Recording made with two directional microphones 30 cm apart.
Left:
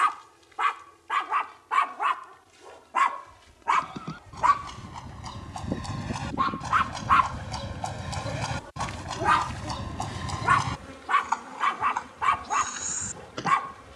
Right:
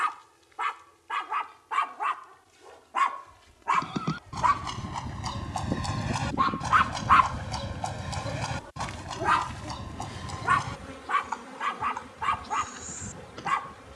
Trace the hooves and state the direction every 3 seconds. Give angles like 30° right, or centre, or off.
off, 40° right, centre, 40° left, 60° left.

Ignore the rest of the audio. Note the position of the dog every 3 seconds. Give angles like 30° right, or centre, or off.
30° left, 10° left, centre, 20° left, 30° left.